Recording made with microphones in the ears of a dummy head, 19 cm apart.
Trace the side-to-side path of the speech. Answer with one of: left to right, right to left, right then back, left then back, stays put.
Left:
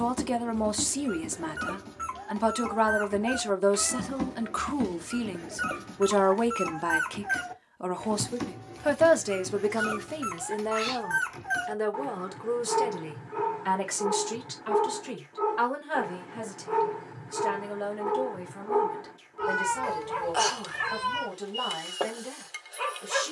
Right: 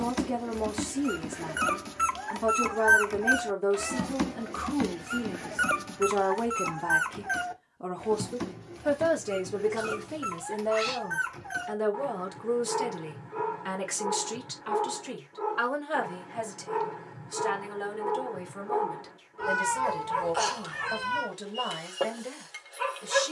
left to right.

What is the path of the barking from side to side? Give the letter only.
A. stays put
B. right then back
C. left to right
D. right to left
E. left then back
D.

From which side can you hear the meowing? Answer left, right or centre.
centre.